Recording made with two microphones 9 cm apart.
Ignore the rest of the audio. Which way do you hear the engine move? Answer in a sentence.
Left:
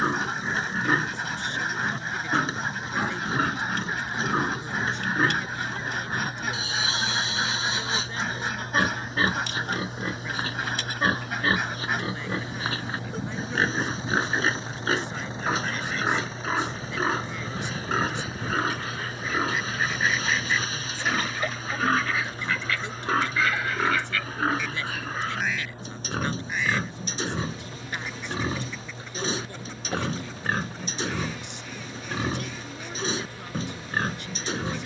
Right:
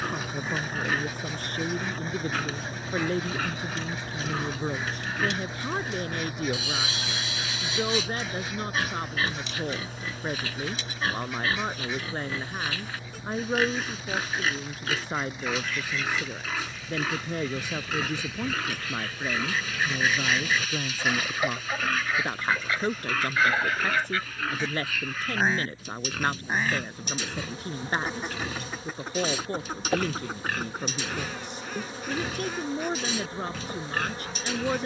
You can hear the engine move from right to left.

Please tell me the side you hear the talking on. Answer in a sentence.
In this clip you hear the talking on the right.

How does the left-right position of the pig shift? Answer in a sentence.
In this clip you hear the pig stay in one place.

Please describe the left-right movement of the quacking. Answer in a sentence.
In this clip you hear the quacking move to the right.